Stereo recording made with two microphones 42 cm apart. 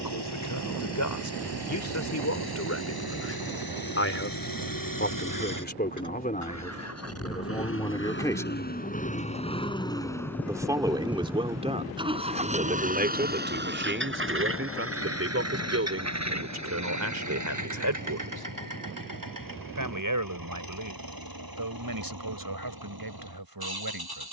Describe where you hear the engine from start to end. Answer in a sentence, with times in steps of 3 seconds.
In this clip you hear the engine on the left from 0 s, in the centre from 9 s and on the right from 12 s.